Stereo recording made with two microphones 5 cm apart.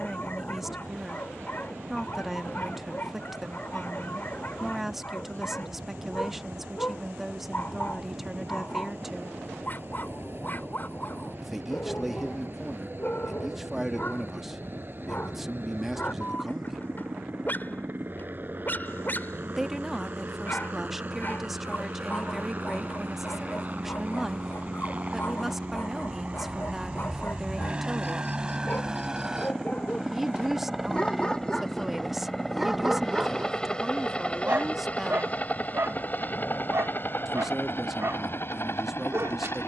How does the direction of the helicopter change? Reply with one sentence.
In this clip you hear the helicopter move from right to left.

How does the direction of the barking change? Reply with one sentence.
In this clip you hear the barking travel towards the right.